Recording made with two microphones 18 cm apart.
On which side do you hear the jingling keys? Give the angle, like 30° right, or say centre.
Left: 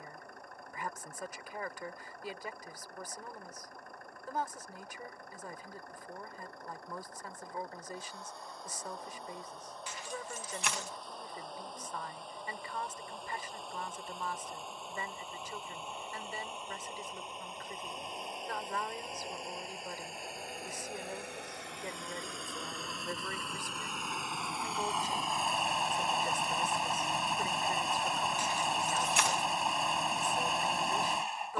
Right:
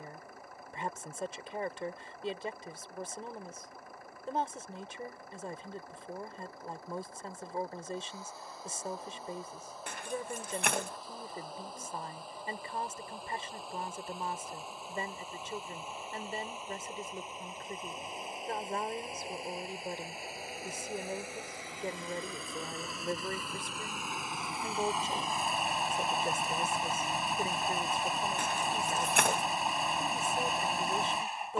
60° right.